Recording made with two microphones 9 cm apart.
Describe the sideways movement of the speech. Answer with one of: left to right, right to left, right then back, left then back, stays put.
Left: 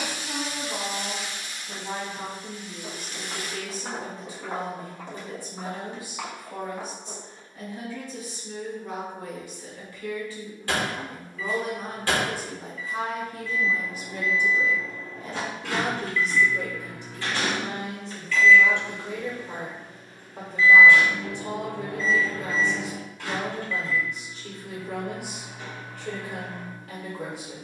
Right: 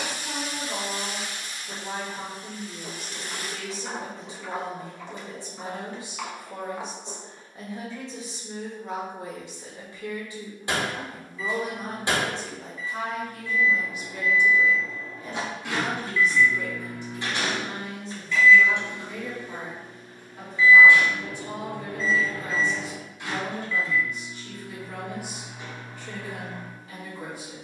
right to left.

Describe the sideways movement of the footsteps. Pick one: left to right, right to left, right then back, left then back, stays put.
left then back.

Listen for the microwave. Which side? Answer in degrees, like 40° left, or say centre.
20° right.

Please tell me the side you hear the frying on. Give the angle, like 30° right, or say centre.
40° right.